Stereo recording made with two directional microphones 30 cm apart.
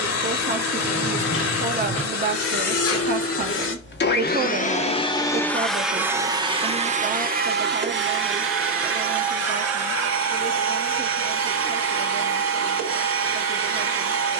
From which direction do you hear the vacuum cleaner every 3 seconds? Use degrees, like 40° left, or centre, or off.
60° left, 30° left, 30° right, 50° right, 50° right.